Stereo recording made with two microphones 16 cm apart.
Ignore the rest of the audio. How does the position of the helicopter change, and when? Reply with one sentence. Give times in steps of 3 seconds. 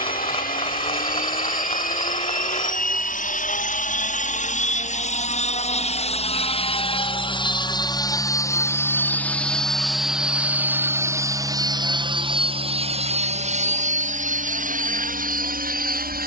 You can hear the helicopter on the left from 0 s, in the centre from 9 s and on the right from 12 s.